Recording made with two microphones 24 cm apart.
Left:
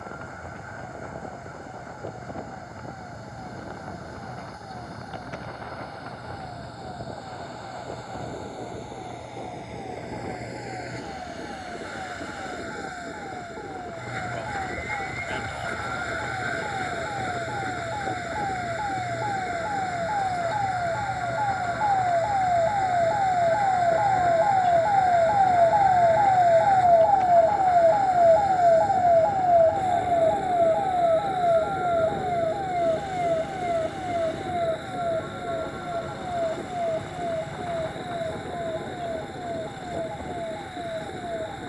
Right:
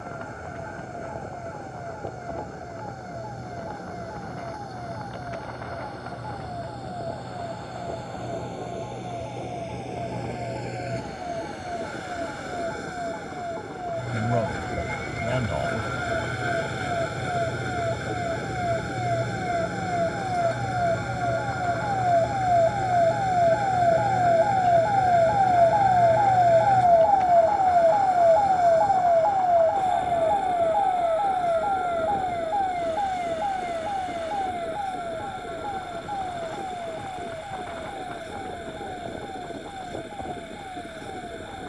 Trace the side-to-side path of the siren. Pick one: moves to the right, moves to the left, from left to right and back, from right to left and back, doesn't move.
moves to the left.